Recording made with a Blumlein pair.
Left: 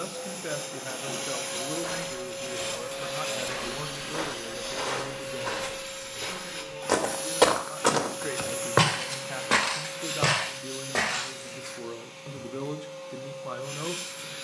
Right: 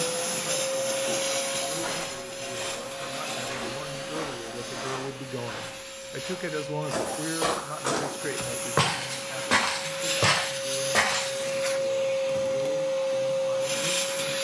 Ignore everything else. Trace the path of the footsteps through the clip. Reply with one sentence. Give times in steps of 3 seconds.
You can hear the footsteps in the centre from 0 s, on the left from 3 s, in the centre from 9 s and not at all from 12 s.